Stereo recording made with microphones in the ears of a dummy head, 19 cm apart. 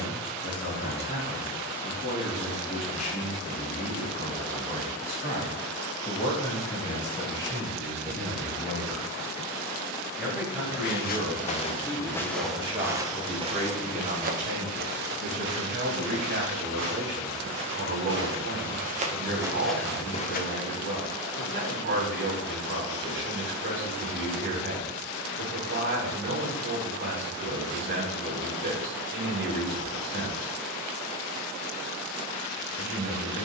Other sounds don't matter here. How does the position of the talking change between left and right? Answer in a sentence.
You can hear the talking go from the left side to the right.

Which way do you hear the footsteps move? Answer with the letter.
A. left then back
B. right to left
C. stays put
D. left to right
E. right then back
E.